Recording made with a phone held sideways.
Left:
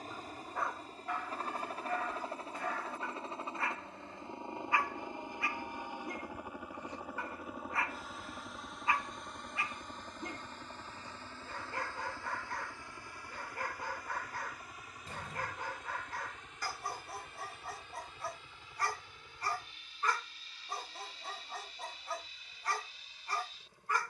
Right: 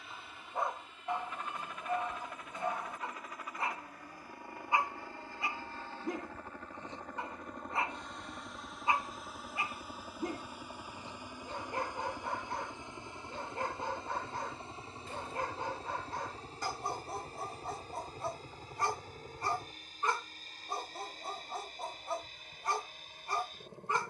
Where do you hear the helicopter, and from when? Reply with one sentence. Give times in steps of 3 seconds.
In this clip you hear the helicopter on the left from 0 s, in the centre from 6 s and on the right from 12 s.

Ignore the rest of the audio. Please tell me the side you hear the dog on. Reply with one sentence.
In this clip you hear the dog on the right.